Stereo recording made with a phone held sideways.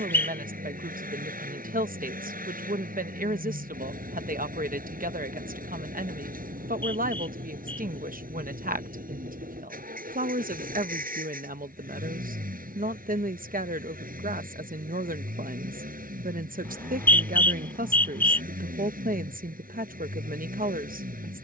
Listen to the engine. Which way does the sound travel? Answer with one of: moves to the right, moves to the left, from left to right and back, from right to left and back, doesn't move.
doesn't move.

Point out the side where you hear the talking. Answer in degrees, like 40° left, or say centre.
80° right.